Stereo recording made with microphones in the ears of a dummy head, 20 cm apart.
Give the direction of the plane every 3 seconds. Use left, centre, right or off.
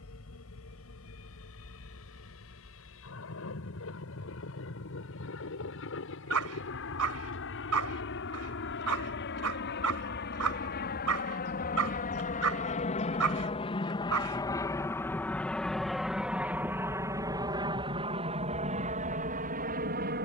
left, left, left, left, left, centre, right.